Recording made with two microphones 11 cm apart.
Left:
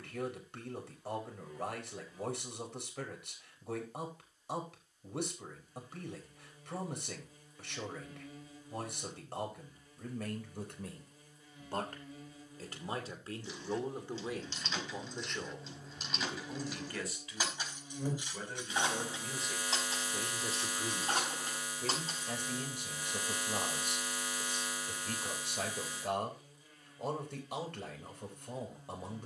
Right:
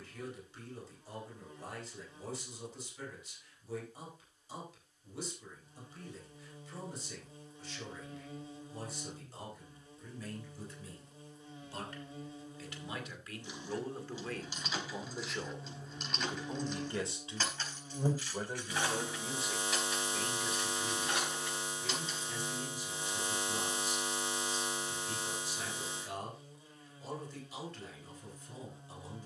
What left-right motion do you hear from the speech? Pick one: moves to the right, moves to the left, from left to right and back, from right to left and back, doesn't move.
from left to right and back.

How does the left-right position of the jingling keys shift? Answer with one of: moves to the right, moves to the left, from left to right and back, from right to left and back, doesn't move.
moves to the left.